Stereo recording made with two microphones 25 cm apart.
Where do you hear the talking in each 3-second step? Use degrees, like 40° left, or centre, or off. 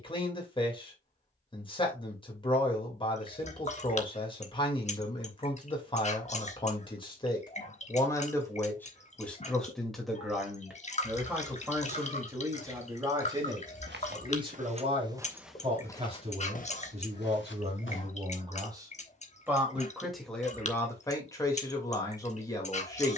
20° left, 20° left, 20° left, centre, 20° right, 30° right, 10° right, 10° left.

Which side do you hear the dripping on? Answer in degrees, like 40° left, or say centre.
30° left.